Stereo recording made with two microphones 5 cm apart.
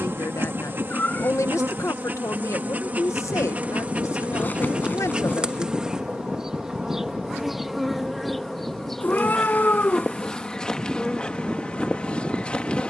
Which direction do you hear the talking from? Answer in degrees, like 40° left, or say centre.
80° left.